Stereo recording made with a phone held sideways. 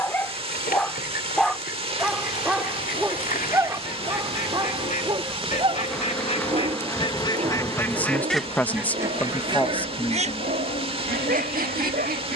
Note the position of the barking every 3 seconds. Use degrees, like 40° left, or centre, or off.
centre, 20° right, 50° right, 60° right.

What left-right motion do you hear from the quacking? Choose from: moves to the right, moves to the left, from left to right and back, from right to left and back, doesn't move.
moves to the right.